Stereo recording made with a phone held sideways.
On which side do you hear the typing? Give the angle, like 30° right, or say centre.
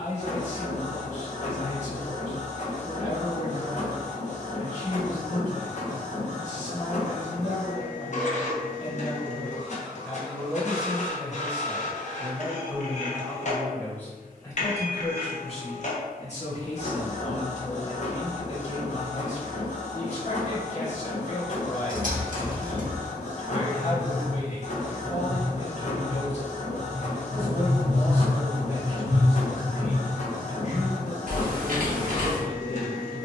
60° right.